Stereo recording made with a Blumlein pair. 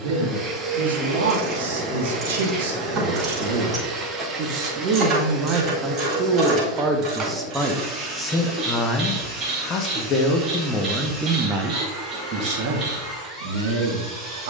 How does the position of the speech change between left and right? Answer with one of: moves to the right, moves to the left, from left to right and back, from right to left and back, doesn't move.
from right to left and back.